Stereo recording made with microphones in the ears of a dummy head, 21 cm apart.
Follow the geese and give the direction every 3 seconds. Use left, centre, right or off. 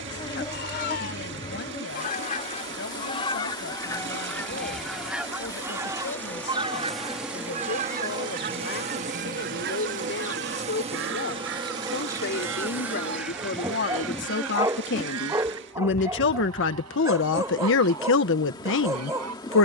left, centre, right, right, right, right, right.